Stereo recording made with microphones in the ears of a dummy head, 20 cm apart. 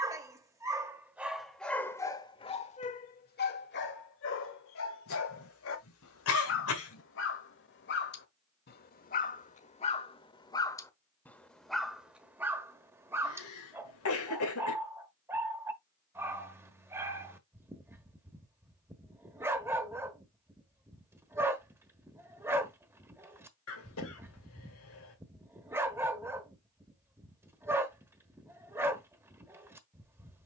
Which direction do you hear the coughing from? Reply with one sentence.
You can hear the coughing on the left.